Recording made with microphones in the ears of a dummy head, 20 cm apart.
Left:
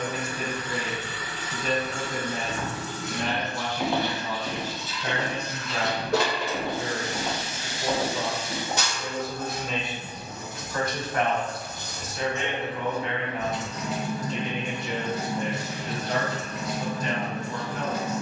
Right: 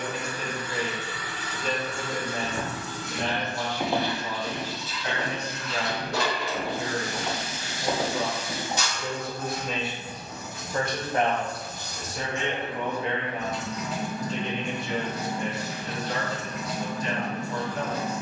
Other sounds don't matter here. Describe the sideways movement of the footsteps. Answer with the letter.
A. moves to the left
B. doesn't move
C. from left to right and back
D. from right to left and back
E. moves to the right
D.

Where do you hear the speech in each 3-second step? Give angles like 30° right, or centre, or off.
50° left, 50° left, 30° left, 10° right, 20° right, 40° left.